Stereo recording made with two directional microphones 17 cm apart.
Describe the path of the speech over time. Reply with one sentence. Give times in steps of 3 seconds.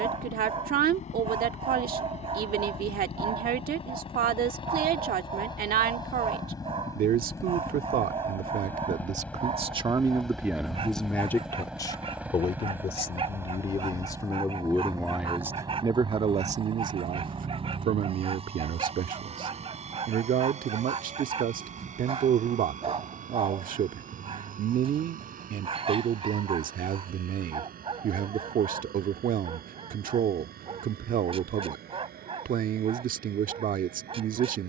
You can hear the speech on the right from 0 s, in the centre from 9 s, on the left from 12 s and on the right from 15 s.